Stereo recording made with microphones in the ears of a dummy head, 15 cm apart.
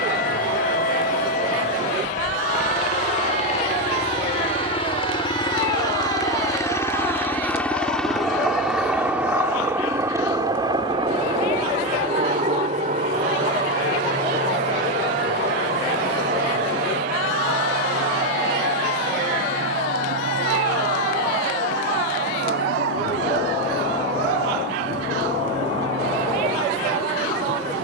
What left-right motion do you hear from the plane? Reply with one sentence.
You can hear the plane go from the left side to the right.